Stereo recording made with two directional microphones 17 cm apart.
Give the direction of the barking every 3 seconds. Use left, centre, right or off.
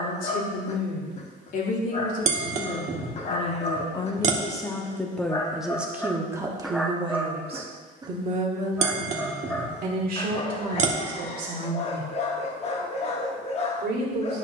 left, left, centre, left, left.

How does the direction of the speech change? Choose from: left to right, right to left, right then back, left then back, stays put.
left to right.